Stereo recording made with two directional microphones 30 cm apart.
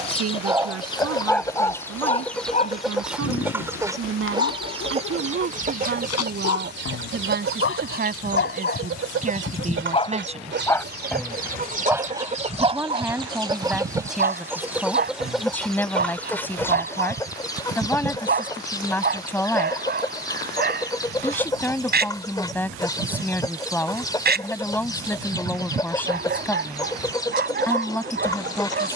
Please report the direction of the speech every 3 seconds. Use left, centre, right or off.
right, right, right, right, centre, centre, centre, centre, centre, centre.